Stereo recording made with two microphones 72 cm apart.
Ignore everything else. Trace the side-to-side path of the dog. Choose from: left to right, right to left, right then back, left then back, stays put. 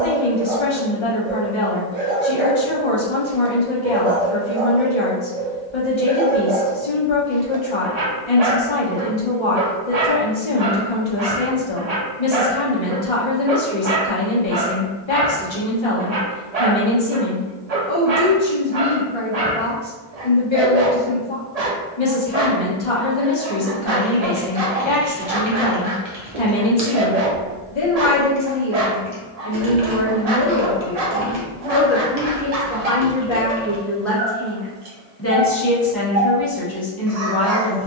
stays put.